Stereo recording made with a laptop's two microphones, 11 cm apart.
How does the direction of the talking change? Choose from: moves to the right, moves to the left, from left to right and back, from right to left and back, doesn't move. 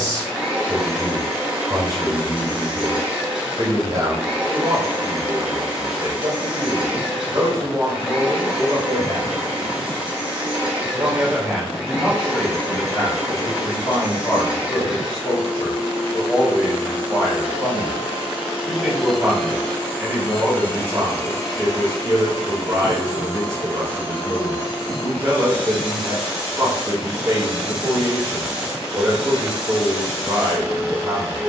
from right to left and back.